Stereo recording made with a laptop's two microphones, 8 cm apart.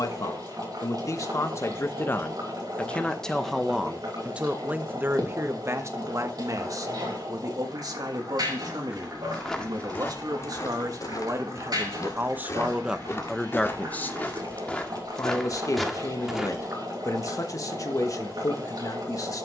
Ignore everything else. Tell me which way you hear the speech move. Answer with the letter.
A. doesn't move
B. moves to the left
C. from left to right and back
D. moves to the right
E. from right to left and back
C.